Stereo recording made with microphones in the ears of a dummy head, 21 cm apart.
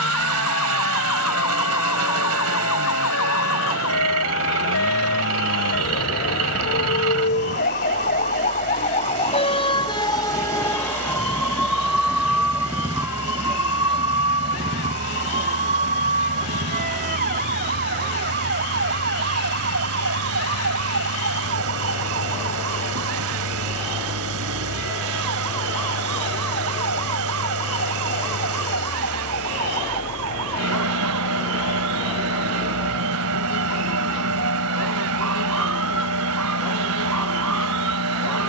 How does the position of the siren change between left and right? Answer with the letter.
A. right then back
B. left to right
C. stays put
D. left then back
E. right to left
B.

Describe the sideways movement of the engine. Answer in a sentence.
You can hear the engine stay put.